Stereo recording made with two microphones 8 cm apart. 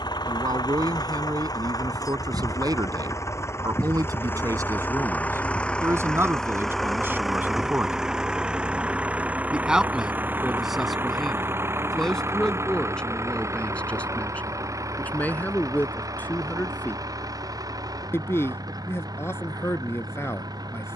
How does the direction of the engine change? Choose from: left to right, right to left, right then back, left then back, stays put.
left to right.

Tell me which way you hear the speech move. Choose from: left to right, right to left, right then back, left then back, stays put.
right to left.